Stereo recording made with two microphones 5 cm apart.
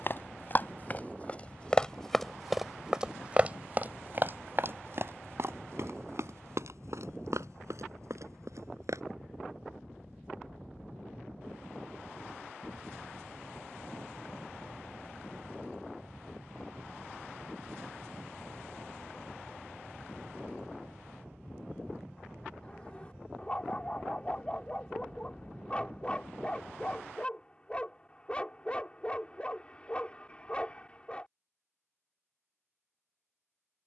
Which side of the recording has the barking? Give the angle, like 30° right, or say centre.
20° left.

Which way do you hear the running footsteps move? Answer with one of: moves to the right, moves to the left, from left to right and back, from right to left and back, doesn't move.
moves to the right.